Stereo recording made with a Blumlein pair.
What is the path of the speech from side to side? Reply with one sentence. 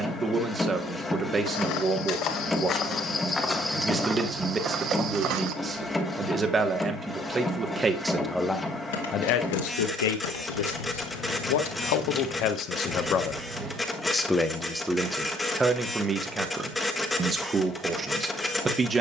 You can hear the speech go left and come back.